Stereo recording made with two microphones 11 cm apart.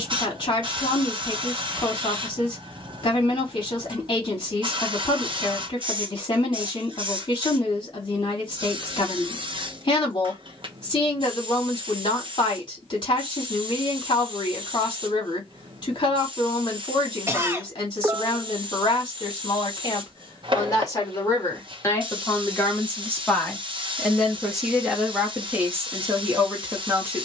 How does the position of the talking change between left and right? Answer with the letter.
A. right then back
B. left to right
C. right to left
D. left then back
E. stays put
B.